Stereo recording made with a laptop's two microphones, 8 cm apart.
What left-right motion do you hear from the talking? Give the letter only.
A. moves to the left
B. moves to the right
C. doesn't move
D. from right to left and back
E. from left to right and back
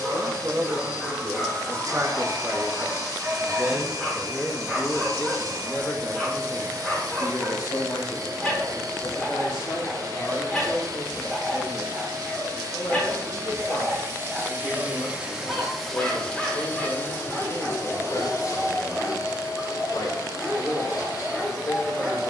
A.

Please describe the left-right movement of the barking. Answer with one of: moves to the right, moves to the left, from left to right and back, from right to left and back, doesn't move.
doesn't move.